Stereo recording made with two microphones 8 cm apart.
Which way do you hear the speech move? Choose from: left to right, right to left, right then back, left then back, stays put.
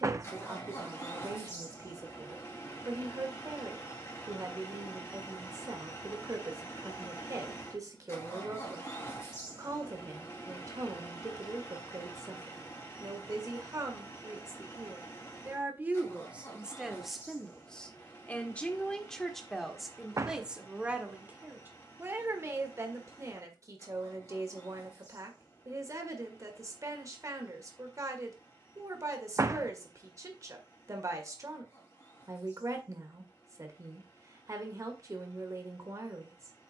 left then back.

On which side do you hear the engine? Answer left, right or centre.
left.